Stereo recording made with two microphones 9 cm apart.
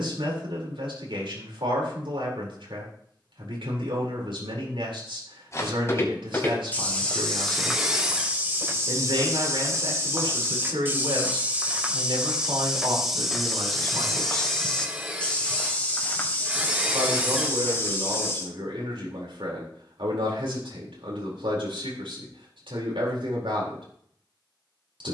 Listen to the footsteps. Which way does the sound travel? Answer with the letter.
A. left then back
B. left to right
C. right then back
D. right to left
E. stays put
C.